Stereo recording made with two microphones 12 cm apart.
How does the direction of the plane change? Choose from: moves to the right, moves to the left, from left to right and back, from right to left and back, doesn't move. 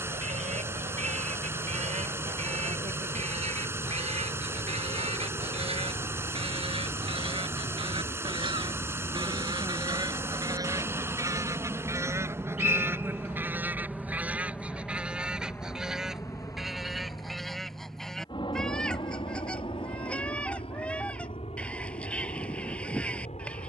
moves to the left.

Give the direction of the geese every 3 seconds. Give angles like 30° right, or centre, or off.
80° right, 60° right, 50° right, 30° right, 20° right, centre, 10° left, 10° left.